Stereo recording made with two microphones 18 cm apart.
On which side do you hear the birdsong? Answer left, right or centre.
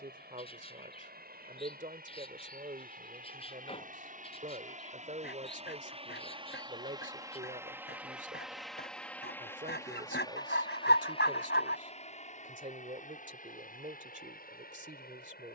left.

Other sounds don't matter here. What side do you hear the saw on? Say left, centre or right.
left.